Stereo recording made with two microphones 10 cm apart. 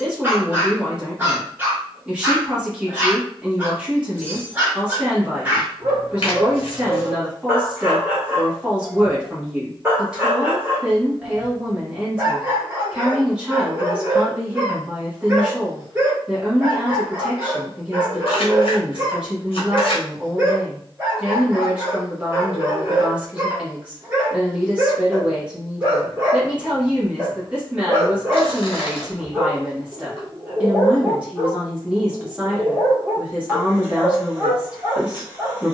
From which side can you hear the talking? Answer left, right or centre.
centre.